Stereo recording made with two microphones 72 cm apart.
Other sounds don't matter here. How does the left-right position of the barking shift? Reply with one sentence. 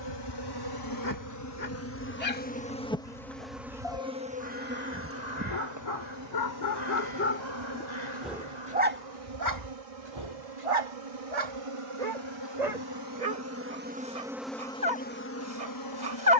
In this clip you hear the barking travel towards the right.